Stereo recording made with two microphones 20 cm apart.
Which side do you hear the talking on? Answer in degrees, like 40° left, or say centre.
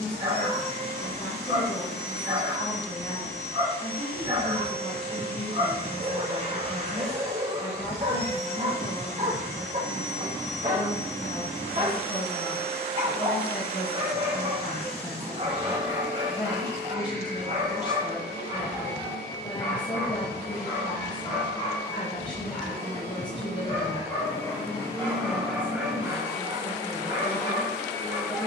20° left.